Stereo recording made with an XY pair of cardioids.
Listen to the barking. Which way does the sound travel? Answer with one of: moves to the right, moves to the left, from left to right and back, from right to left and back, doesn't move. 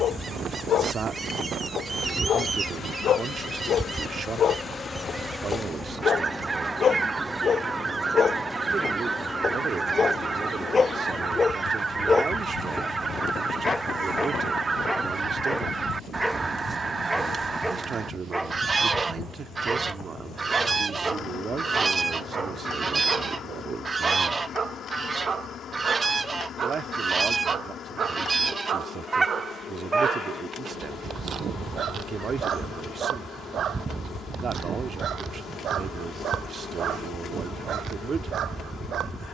moves to the right.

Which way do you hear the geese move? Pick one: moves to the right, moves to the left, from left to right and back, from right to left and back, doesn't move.
doesn't move.